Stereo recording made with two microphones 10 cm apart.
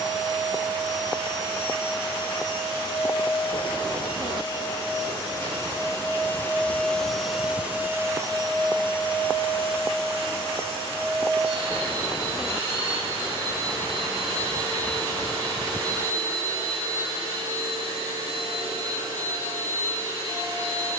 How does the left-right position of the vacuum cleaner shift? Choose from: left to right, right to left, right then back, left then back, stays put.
left to right.